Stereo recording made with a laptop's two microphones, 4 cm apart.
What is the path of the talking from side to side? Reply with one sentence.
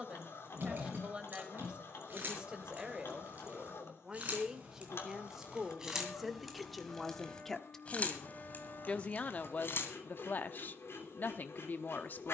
In this clip you hear the talking move to the left.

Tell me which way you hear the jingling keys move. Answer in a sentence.
In this clip you hear the jingling keys go from the right side to the left.